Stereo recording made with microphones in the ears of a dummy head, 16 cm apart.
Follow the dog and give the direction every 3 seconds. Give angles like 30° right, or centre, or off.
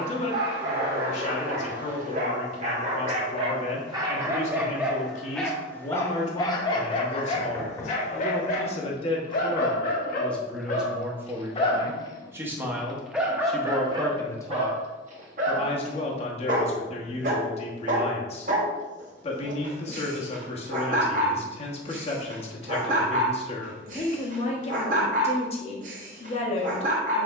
50° right, 10° right, 30° left, 40° left, 20° right, 50° right, 50° right, 50° right, 50° right.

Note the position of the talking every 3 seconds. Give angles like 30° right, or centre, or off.
40° left, 40° left, 40° left, centre, centre, 30° left, 30° left, 30° left, 30° left.